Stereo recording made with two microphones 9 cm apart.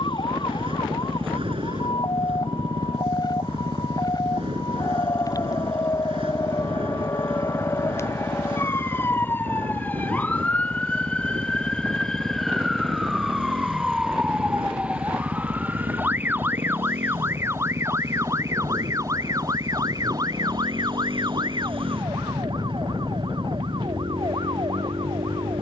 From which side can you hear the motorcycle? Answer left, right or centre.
right.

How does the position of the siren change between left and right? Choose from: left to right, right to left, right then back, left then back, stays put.
left to right.